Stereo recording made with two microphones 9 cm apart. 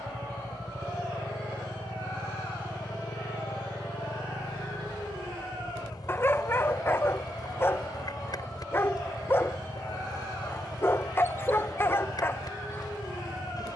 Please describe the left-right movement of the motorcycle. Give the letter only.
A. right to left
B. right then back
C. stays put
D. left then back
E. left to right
C.